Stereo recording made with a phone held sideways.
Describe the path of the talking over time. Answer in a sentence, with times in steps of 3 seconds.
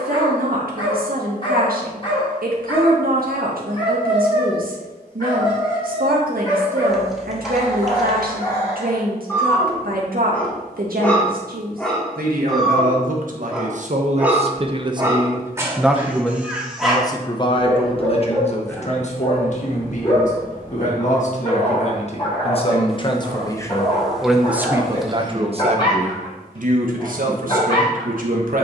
You can hear the talking on the right from 0 s, in the centre from 15 s, on the left from 18 s and on the right from 24 s.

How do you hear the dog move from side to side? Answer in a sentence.
In this clip you hear the dog move from left to right and back again.